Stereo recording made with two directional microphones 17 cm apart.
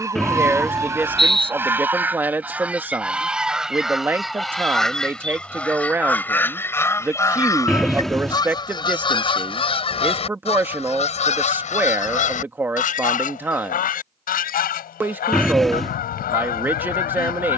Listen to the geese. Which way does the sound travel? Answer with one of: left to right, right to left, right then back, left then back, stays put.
right to left.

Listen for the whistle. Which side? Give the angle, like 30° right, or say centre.
centre.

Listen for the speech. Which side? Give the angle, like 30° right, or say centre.
10° right.